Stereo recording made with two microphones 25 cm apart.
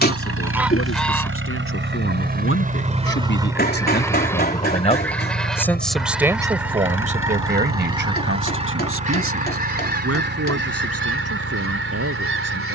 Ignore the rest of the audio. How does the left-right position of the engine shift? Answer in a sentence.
You can hear the engine travel towards the left.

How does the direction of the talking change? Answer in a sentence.
You can hear the talking go from the left side to the right.